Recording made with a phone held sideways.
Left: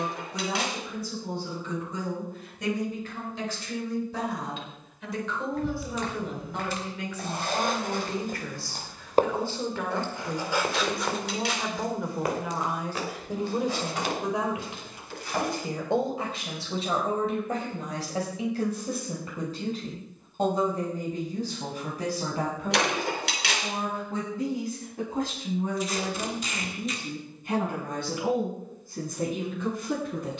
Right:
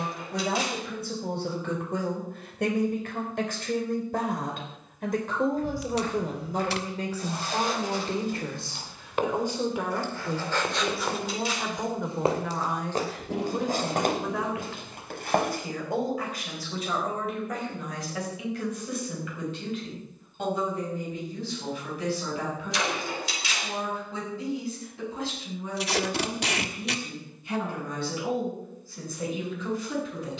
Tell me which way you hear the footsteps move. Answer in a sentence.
In this clip you hear the footsteps move from left to right.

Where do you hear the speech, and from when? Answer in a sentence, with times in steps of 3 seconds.
In this clip you hear the speech on the right from 0 s, in the centre from 9 s and on the left from 15 s.